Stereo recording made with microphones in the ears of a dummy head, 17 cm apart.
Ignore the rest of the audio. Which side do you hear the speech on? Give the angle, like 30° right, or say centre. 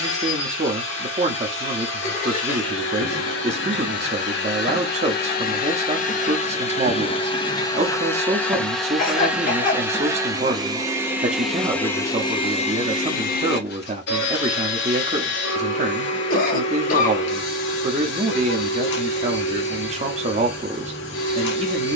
30° right.